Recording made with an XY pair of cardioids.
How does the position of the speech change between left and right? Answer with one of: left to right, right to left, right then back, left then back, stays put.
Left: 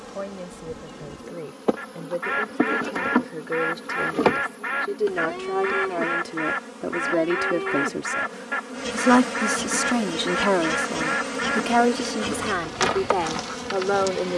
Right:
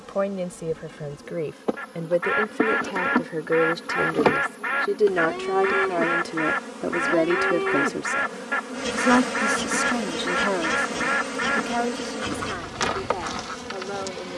right to left.